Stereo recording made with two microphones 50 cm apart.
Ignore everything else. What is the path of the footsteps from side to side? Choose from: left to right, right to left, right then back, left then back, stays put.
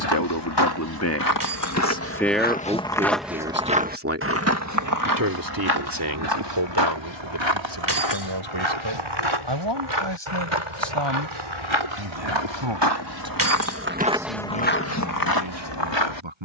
right then back.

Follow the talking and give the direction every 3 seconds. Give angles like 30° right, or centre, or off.
20° left, 30° right, 50° right, 60° right, 60° right, 60° right.